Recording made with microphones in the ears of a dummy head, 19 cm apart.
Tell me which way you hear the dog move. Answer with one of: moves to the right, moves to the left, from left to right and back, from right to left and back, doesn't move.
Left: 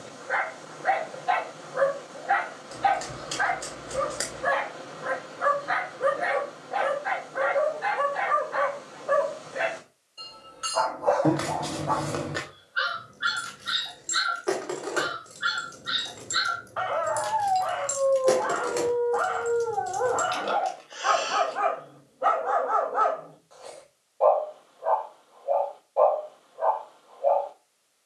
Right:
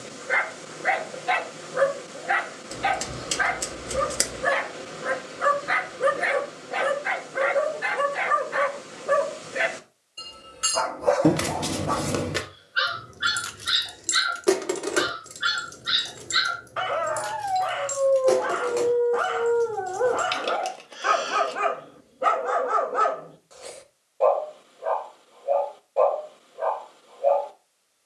doesn't move.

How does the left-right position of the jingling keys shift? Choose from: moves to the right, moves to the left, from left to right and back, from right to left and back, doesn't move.
moves to the left.